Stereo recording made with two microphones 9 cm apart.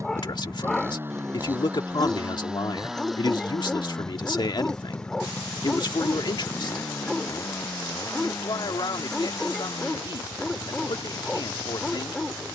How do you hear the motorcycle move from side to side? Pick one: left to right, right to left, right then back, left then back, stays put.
right to left.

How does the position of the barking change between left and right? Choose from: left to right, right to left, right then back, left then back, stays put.
stays put.